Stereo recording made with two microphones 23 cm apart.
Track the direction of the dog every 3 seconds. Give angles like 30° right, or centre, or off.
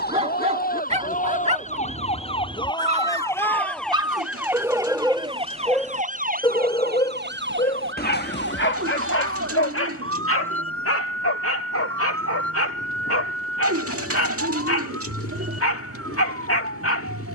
30° right, 10° right, 40° left, 70° left, 80° left, 80° left.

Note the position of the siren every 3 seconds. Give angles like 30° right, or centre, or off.
30° left, 10° right, 50° right, 70° right, 80° right, 80° right.